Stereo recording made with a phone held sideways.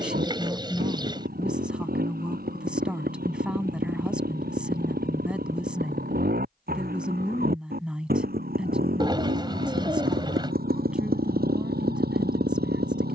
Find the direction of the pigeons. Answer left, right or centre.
right.